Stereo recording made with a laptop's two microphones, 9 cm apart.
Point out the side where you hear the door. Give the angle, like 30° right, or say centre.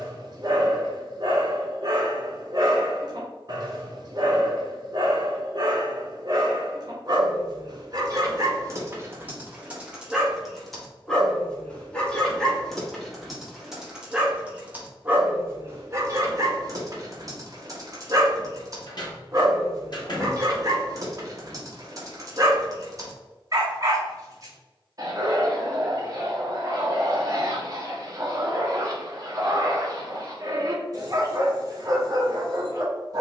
50° left.